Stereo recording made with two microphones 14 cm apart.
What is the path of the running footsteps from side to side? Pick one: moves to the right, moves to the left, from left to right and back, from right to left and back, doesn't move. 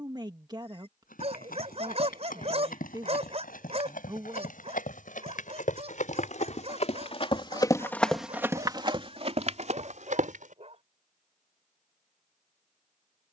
moves to the right.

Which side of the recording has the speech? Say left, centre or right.
right.